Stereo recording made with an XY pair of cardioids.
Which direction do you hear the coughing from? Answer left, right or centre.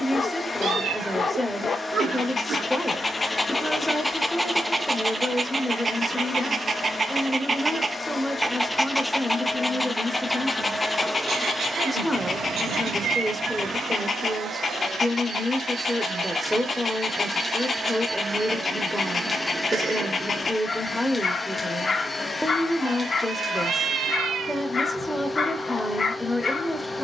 right.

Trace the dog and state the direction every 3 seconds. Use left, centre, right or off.
left, centre, right, left, left, left, left, left, left.